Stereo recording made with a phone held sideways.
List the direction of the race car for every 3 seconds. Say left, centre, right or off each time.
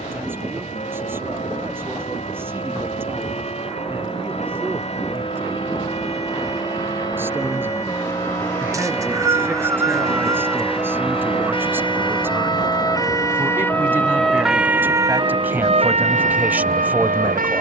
left, left, left, centre, right, right.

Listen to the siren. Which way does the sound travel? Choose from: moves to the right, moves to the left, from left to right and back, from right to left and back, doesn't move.
moves to the right.